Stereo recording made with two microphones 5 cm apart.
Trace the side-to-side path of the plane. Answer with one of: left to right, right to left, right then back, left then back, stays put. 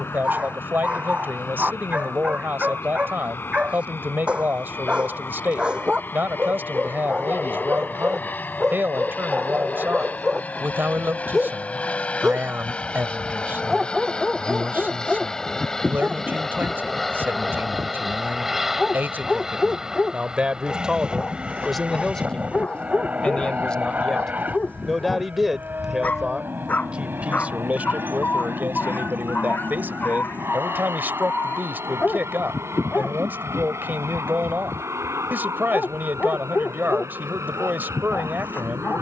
left to right.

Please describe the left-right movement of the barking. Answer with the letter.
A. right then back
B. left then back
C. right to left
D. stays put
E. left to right
C.